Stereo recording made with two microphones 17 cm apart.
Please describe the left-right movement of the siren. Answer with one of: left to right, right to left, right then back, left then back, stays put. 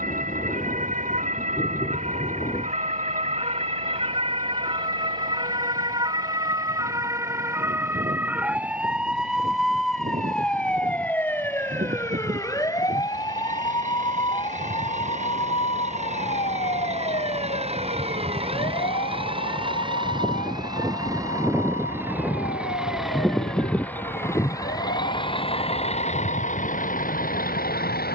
right to left.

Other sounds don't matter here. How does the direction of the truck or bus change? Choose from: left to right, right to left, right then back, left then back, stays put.
right to left.